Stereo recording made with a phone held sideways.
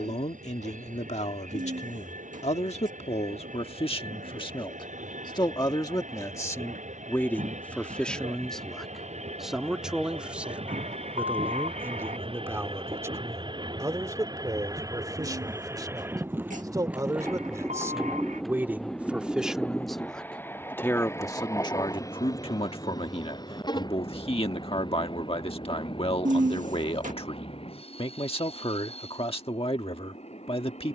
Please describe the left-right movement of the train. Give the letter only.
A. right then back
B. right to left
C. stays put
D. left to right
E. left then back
B.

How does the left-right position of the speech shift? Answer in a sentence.
In this clip you hear the speech go right and come back.